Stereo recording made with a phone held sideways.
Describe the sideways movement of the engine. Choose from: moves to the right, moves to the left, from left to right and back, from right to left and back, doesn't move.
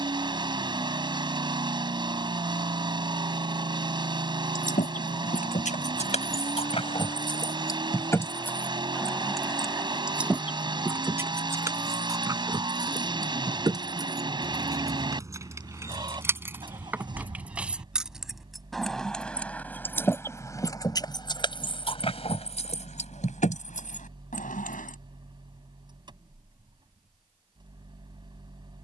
doesn't move.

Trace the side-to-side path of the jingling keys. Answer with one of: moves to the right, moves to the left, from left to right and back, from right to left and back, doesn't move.
from left to right and back.